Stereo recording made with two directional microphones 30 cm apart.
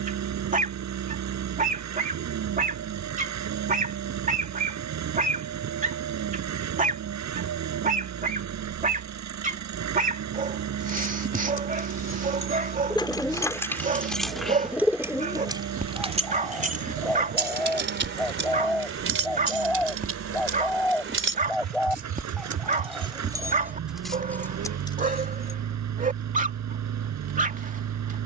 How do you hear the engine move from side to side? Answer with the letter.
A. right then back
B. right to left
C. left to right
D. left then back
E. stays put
E.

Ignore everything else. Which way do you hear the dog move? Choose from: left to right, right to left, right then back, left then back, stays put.
stays put.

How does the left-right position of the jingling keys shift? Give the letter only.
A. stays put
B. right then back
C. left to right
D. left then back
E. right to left
B.